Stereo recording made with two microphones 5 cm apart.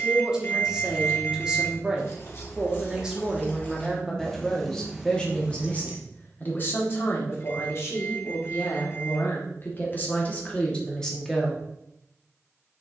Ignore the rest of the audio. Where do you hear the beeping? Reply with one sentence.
In this clip you hear the beeping on the left.